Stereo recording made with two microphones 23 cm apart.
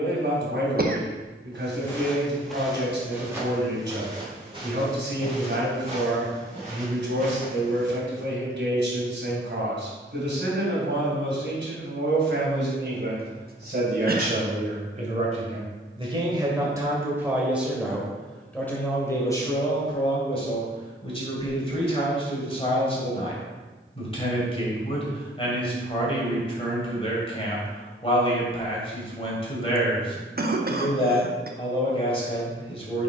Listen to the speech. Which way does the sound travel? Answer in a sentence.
You can hear the speech move from right to left.